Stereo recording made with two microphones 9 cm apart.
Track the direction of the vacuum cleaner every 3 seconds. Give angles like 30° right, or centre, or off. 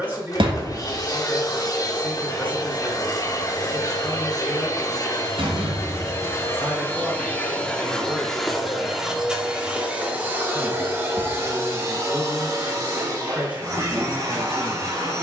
40° left, 40° left, 20° left, 20° right, 40° right.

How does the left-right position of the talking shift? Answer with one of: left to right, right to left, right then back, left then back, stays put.
stays put.